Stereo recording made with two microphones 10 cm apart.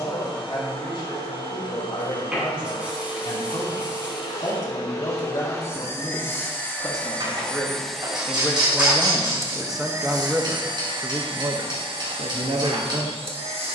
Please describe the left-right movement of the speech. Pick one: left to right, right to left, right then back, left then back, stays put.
left to right.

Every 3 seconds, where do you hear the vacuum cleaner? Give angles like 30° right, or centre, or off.
50° left, 40° left, 10° left, 40° right, 70° right.